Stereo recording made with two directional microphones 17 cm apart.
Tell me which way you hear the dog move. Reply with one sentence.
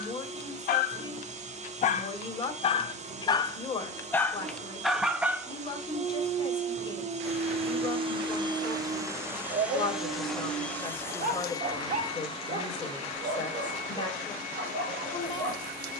You can hear the dog go from the left side to the right.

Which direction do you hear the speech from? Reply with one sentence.
You can hear the speech on the left.